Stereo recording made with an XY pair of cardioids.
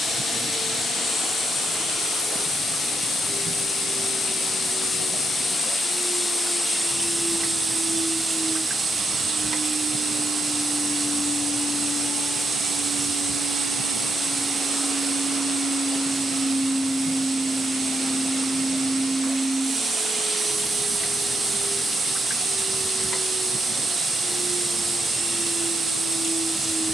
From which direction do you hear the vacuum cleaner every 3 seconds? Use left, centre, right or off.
left, left, centre, right, right, right, right, right, right.